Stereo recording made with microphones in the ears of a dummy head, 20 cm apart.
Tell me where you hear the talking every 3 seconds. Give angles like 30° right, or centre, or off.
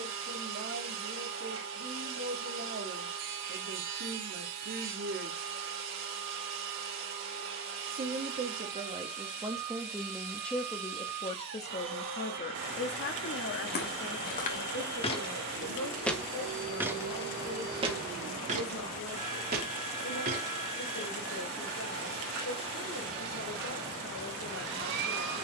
50° right, 50° right, 30° right, 10° left, 60° left, 70° left, 80° left, 80° left, 80° left.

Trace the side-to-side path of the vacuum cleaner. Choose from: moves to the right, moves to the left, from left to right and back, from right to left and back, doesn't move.
doesn't move.